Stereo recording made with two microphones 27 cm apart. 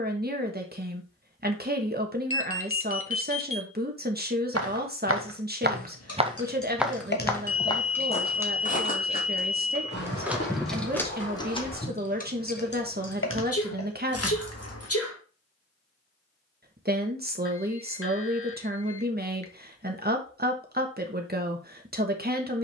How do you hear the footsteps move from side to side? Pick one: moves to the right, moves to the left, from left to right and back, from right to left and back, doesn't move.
moves to the left.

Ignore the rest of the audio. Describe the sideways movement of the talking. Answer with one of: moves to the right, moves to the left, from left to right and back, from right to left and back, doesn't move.
doesn't move.